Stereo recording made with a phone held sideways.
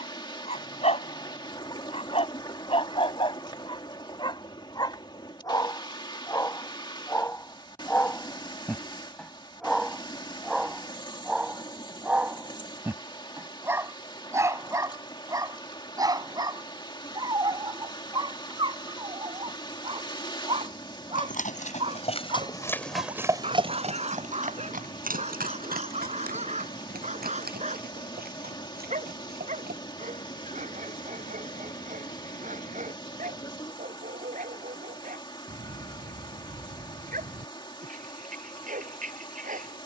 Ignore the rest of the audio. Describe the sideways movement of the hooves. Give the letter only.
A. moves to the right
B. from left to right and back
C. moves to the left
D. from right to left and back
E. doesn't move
A.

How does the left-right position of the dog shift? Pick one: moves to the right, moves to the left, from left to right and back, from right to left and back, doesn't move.
moves to the right.